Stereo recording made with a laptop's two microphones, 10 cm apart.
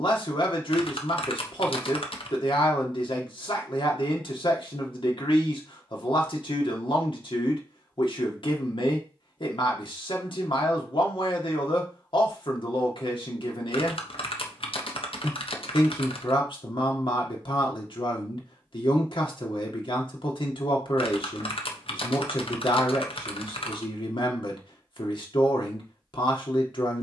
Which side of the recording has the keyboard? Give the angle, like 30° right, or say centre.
70° left.